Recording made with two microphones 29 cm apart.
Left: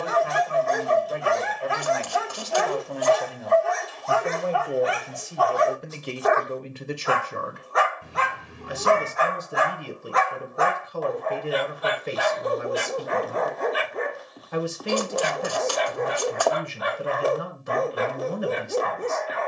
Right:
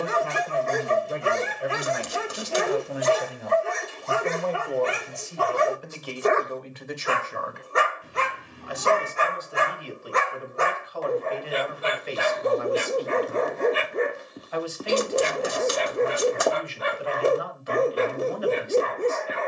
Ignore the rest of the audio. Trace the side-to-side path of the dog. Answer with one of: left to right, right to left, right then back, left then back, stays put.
stays put.